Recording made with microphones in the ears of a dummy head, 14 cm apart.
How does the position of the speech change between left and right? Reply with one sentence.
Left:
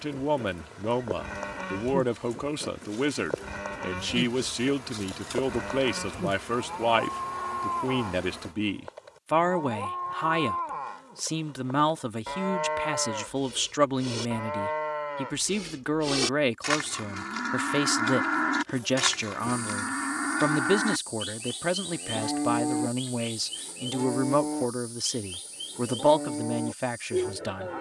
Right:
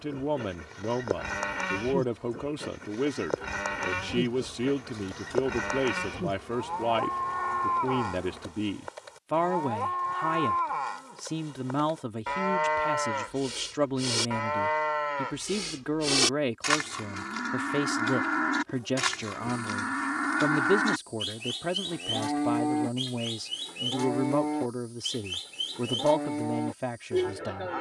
In this clip you hear the speech stay in one place.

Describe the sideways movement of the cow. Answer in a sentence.
You can hear the cow go left and come back.